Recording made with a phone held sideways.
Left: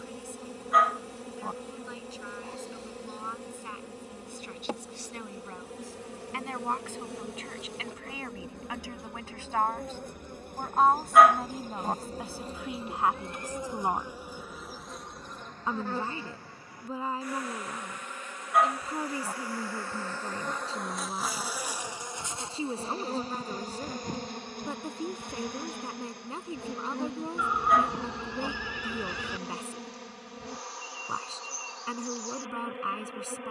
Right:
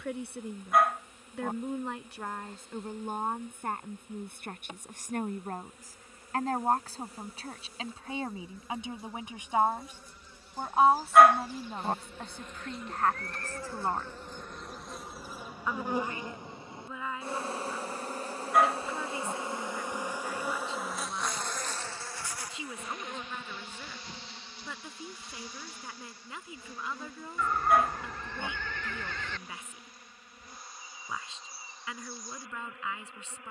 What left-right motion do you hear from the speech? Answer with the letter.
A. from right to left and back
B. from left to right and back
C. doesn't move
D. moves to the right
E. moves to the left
E.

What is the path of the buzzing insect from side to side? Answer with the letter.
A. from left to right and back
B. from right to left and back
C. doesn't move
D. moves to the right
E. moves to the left
A.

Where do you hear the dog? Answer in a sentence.
You can hear the dog in the centre.